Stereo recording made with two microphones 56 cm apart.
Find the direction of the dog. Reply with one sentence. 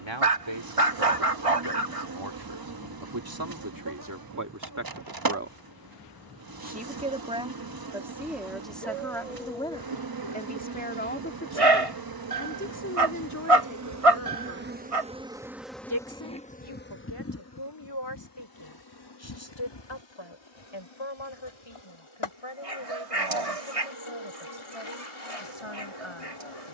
In this clip you hear the dog on the right.